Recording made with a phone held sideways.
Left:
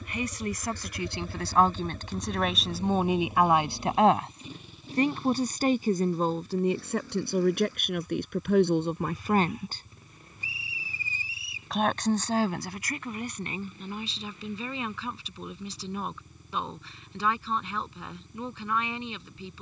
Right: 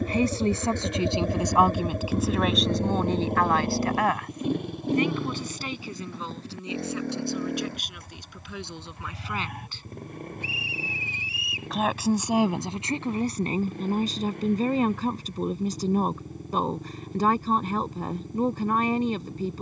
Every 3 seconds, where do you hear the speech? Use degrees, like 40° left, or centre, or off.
20° right, 30° left, 60° left, 30° left, 40° right, 50° right, 50° right.